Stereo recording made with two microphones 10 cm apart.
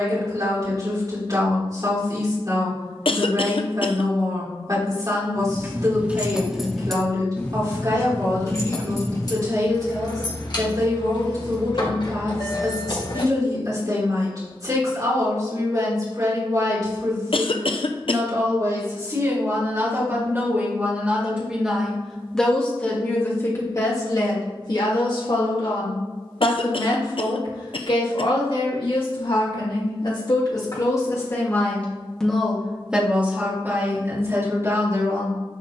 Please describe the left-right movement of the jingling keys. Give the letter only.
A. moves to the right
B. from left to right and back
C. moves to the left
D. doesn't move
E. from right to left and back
C.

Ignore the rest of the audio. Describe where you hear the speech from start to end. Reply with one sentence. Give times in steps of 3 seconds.
You can hear the speech on the right from 0 s, in the centre from 21 s, on the left from 24 s and on the right from 33 s.